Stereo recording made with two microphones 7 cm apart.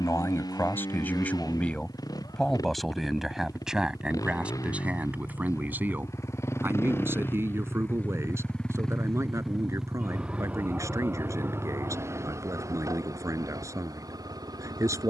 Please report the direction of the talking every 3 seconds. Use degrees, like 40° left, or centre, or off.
20° left, 10° right, 30° right, 40° right, 40° right.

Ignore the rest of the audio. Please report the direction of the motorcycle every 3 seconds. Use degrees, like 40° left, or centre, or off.
60° left, 50° left, 30° left, 20° right, 50° right.